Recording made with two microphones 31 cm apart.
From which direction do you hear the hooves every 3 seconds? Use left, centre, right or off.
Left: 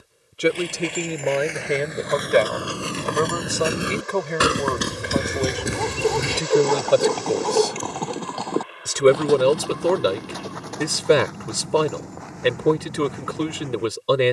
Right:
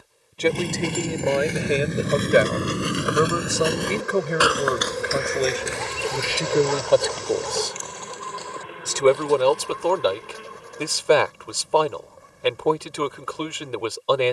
right, left, left, left, left.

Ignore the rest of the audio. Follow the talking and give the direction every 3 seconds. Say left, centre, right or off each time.
centre, centre, centre, left, left.